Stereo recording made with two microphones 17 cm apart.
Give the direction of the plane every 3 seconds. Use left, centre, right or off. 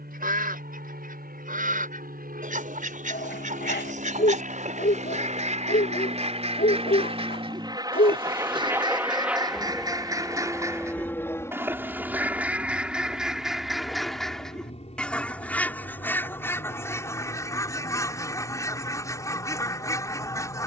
right, right, right, centre, left, left, left.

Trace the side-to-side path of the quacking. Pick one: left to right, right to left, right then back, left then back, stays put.
right to left.